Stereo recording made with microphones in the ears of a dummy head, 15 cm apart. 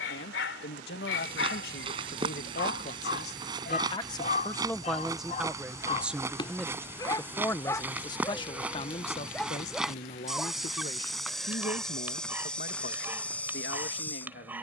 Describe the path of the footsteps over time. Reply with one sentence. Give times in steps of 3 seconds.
In this clip you hear the footsteps on the right from 0 s and in the centre from 6 s.